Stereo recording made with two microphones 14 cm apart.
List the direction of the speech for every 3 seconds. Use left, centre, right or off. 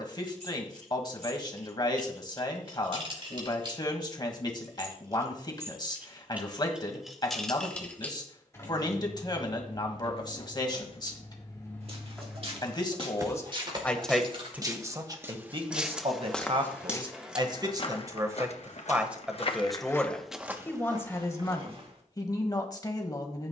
left, left, left, left, centre, right, centre, left.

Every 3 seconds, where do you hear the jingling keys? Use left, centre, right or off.
right, right, centre, left, right, off, off, off.